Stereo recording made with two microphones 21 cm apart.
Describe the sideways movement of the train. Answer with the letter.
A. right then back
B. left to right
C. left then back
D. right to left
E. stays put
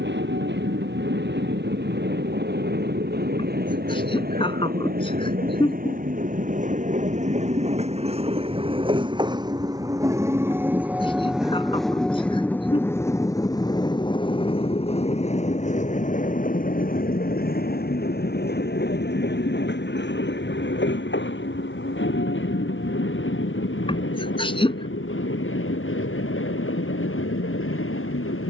D.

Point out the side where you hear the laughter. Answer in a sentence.
In this clip you hear the laughter on the left.